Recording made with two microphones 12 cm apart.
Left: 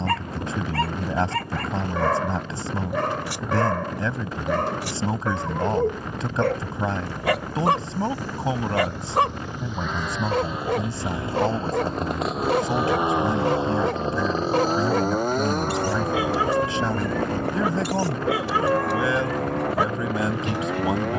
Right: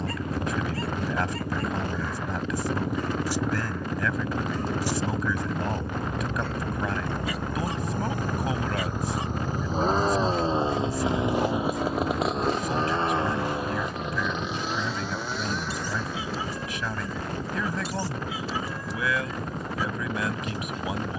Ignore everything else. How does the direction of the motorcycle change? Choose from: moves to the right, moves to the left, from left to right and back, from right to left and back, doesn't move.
moves to the left.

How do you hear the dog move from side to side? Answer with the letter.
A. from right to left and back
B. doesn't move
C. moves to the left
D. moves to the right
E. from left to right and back
B.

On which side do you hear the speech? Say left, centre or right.
left.